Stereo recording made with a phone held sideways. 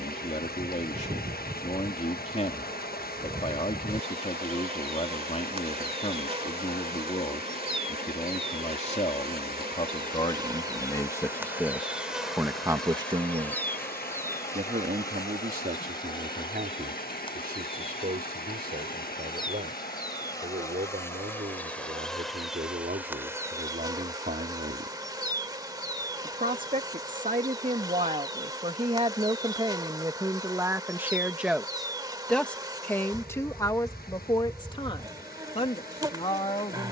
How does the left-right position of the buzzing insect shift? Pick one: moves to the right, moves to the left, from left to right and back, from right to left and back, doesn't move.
from right to left and back.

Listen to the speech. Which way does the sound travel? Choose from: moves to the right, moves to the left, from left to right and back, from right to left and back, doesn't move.
from left to right and back.